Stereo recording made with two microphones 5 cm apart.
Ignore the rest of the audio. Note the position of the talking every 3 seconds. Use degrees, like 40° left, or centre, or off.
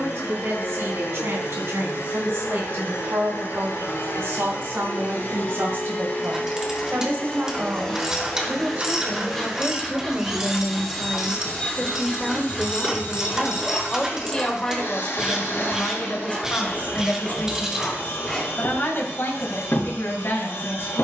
70° right, 60° right, 50° right, 20° right, 10° left, 40° left, 60° left.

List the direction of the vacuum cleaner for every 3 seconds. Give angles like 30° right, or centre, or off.
60° left, 50° left, 20° left, centre, 50° left, 60° left, 60° left.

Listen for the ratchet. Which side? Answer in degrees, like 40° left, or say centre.
10° right.